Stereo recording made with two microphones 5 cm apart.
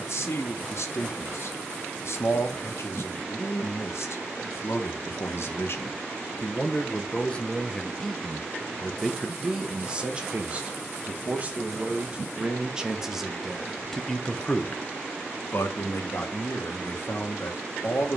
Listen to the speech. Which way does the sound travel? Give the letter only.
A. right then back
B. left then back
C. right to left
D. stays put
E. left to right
A.